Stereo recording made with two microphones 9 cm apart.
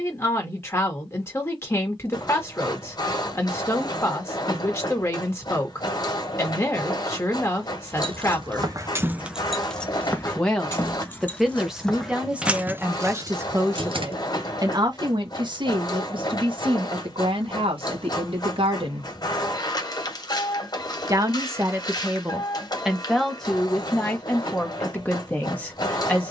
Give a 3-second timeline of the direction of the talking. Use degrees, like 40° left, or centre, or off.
30° left, 30° left, 30° left, centre, 30° right, 60° right, 70° right, 10° right, 20° left.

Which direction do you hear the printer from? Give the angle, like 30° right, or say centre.
40° left.